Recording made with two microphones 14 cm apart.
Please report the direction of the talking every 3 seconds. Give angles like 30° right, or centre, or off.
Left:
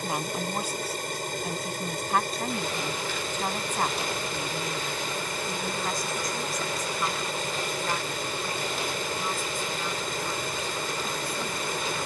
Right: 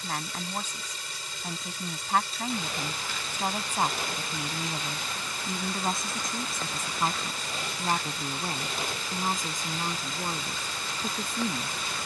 centre, 20° right, 30° right, 50° right.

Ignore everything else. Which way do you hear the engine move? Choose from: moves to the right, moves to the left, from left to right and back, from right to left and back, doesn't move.
doesn't move.